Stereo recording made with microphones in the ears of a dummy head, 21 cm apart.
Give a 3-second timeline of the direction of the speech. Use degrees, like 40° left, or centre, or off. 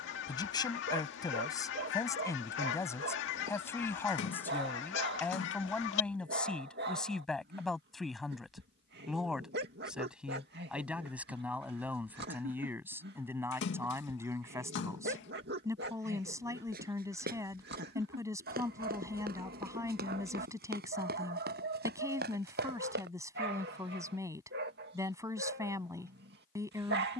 20° left, 10° left, centre, 10° right, 10° right, 10° right, 10° right, 10° right, 10° right.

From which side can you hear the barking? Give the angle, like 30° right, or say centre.
50° right.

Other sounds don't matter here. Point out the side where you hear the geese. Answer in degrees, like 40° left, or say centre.
60° left.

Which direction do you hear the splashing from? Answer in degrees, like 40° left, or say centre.
60° left.